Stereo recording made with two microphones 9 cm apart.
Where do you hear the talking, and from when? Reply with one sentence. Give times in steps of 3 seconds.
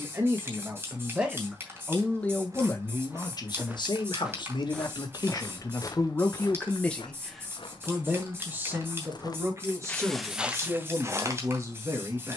You can hear the talking in the centre from 0 s, on the left from 3 s, in the centre from 6 s and on the right from 9 s.